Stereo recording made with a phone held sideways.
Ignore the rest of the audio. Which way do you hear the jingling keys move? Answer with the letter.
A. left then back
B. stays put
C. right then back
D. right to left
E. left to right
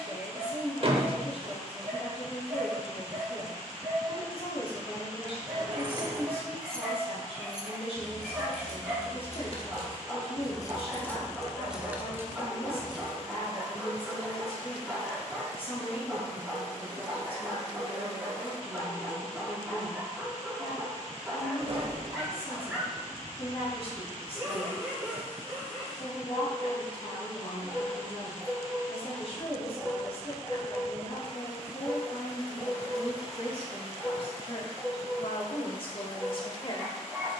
A.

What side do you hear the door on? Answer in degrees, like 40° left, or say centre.
40° right.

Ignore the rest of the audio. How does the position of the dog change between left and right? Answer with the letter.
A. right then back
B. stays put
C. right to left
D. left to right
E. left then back
B.